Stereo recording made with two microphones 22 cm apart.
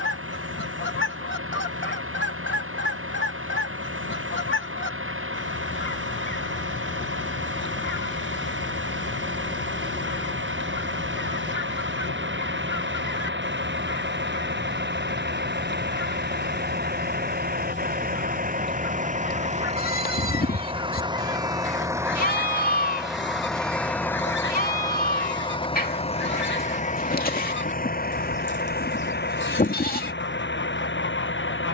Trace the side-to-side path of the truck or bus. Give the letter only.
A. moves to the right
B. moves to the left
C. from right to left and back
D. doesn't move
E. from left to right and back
B.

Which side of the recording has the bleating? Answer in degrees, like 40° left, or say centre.
40° left.